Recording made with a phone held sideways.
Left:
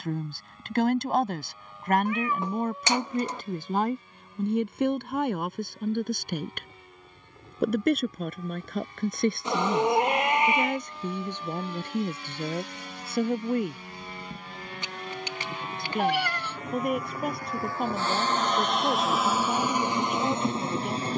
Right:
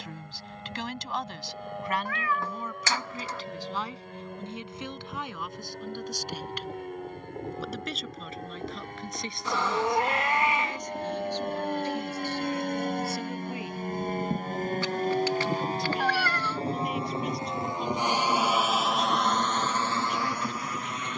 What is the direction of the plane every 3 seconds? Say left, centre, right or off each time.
right, right, right, right, right, right, centre.